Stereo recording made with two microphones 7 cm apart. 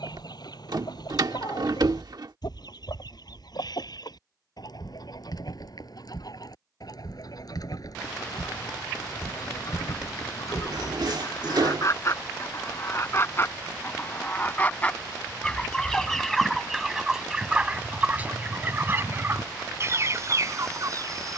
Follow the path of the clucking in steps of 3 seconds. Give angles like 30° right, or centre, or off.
70° left, 60° left, 60° left, 50° left, 30° left, centre, 30° right.